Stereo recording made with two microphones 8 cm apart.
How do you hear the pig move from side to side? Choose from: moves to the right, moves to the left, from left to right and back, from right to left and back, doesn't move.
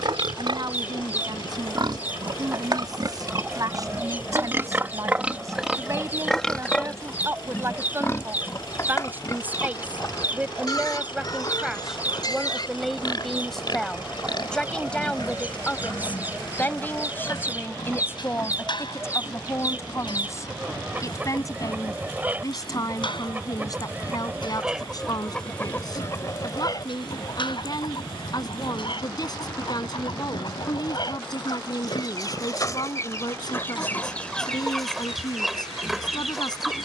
moves to the left.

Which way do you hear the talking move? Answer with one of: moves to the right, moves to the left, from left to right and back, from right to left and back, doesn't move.
moves to the left.